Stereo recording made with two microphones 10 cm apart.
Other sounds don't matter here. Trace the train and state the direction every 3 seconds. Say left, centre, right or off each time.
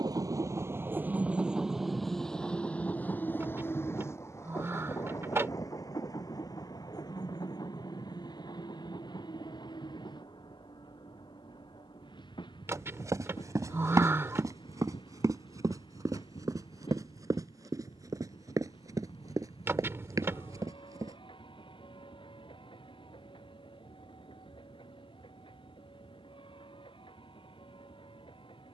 centre, left, left, left, left, left, left, left, left, left.